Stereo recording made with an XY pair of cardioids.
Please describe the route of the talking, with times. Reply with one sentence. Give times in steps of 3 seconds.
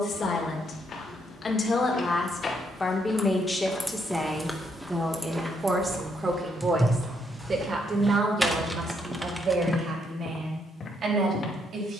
You can hear the talking on the left from 0 s, in the centre from 3 s and on the right from 6 s.